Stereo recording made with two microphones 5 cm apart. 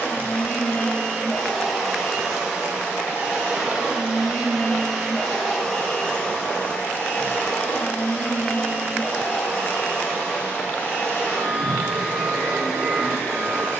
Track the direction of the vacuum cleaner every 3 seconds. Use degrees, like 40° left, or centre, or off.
10° left, centre, 30° left, 30° left, 30° left.